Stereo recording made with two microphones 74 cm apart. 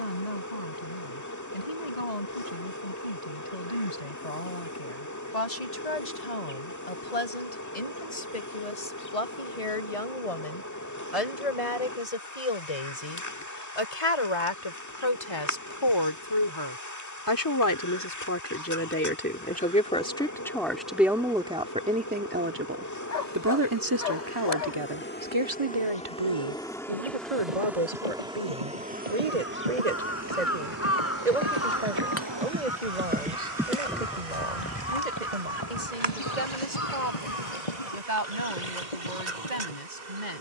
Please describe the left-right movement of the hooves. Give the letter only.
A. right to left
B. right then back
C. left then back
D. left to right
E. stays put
A.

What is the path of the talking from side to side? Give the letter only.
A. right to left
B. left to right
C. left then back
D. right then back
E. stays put
B.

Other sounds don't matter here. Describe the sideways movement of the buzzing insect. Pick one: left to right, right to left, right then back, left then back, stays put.
left to right.